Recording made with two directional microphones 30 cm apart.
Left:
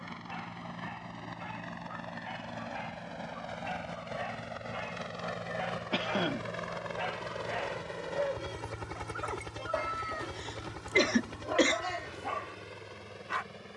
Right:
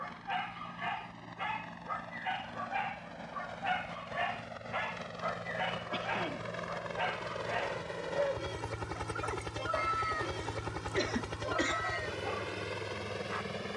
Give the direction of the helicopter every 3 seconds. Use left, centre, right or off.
left, left, centre, right, right.